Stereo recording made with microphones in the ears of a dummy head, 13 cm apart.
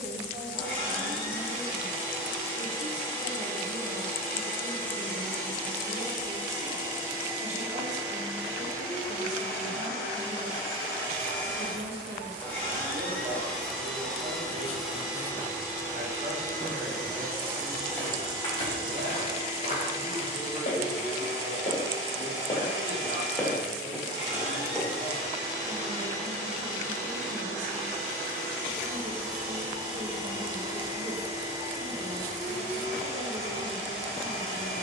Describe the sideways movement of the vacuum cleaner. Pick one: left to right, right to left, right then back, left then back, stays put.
left to right.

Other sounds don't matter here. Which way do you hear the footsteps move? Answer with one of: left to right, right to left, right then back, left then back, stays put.
left then back.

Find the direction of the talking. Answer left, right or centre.
right.